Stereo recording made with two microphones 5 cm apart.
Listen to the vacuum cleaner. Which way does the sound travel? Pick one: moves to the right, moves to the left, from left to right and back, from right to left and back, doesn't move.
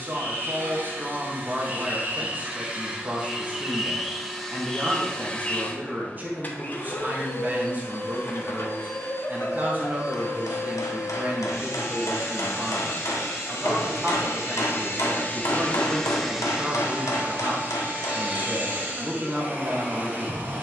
from right to left and back.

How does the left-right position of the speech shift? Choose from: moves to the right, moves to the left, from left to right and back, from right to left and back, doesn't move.
doesn't move.